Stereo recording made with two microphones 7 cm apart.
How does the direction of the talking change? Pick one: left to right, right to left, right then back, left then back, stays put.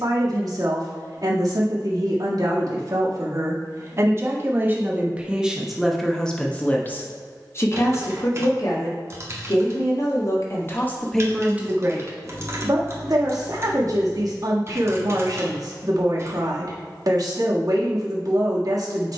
left then back.